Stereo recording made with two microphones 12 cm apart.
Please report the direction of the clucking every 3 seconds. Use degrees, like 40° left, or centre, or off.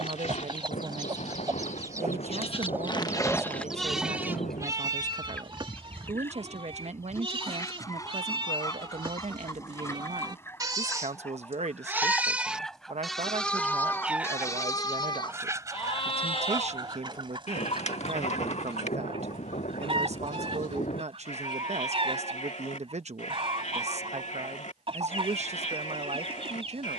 30° right, 10° left, 30° left, 20° left, centre, 40° right, 50° right, 50° right, 50° right.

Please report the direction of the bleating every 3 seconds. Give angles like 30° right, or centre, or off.
70° left, 20° right, 50° right, 30° right, 10° left, 50° left, 70° left, 80° left, 80° left.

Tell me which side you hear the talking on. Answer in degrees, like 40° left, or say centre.
70° right.